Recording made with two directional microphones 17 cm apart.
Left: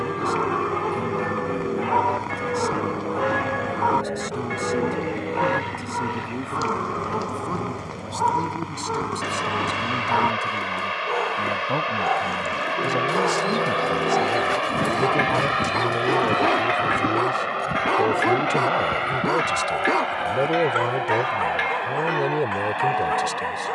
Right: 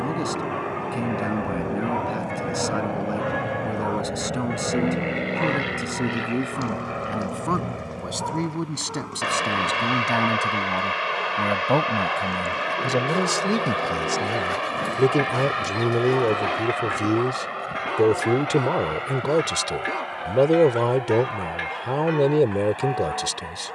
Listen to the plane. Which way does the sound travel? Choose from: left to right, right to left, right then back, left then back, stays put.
right to left.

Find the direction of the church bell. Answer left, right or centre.
left.